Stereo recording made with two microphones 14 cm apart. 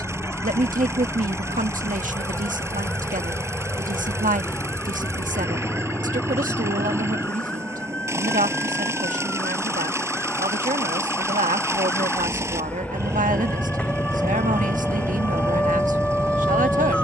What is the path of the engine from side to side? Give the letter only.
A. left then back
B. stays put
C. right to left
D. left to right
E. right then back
B.